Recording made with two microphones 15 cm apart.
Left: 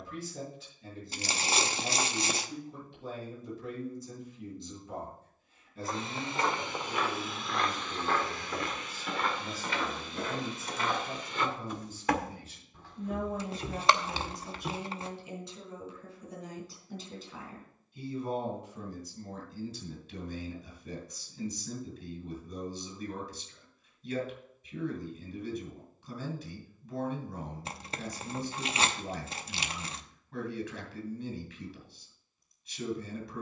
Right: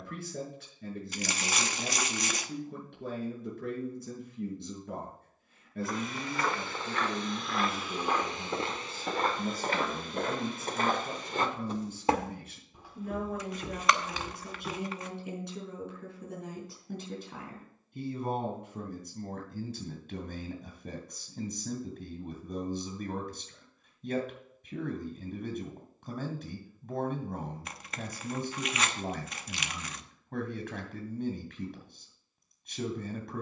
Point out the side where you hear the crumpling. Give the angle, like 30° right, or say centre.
30° left.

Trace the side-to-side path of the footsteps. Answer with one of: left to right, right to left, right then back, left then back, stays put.
right then back.